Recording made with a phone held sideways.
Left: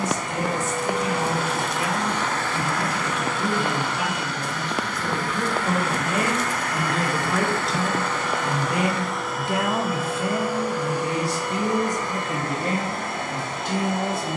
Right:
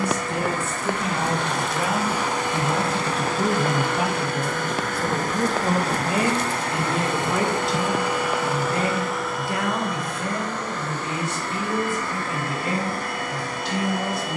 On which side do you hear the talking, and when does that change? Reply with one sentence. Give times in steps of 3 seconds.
In this clip you hear the talking on the right from 0 s, in the centre from 6 s and on the left from 9 s.